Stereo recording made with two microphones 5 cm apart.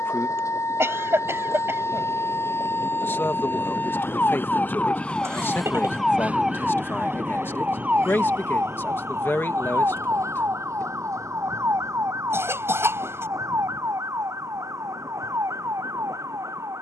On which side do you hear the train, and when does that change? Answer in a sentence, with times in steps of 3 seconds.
You can hear the train on the left from 0 s and on the right from 6 s.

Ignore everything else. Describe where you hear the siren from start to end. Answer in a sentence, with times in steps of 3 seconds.
You can hear the siren on the left from 0 s and on the right from 6 s.